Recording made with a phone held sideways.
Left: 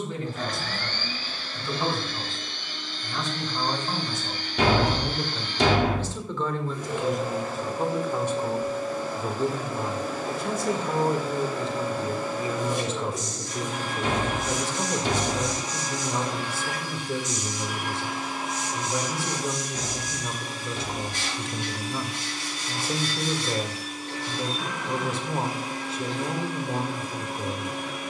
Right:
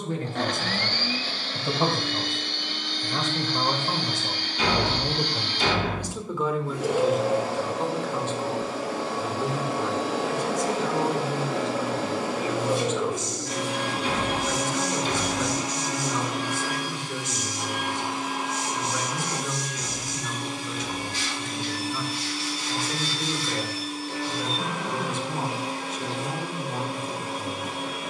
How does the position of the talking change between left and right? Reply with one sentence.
In this clip you hear the talking move to the left.